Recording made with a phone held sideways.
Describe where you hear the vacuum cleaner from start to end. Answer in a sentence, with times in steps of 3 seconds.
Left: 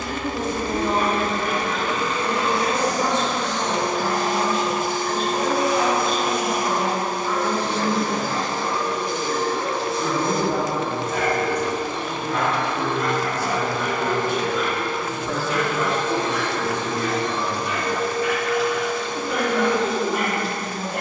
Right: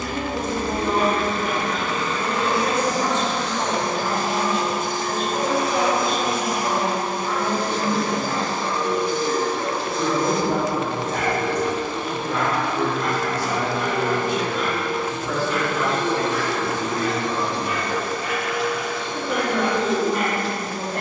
You can hear the vacuum cleaner on the left from 0 s and in the centre from 9 s.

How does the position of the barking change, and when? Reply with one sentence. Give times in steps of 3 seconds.
In this clip you hear the barking on the right from 0 s and in the centre from 18 s.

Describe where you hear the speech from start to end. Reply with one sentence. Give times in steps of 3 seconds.
In this clip you hear the speech on the right from 0 s, in the centre from 15 s and on the right from 18 s.